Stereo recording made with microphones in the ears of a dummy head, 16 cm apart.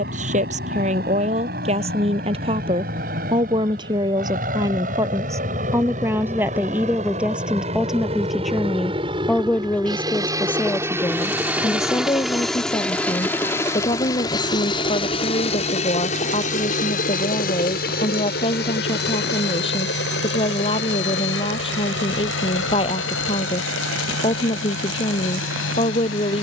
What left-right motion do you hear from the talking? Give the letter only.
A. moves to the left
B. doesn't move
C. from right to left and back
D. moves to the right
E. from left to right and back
A.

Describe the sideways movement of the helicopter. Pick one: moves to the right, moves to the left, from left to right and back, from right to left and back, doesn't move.
moves to the left.